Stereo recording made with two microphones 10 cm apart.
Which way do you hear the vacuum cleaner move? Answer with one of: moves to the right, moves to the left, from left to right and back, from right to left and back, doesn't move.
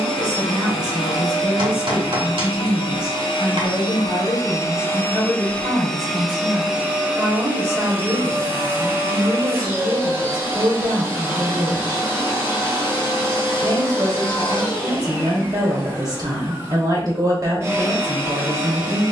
moves to the right.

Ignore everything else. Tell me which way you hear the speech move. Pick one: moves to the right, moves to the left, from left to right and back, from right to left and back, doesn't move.
doesn't move.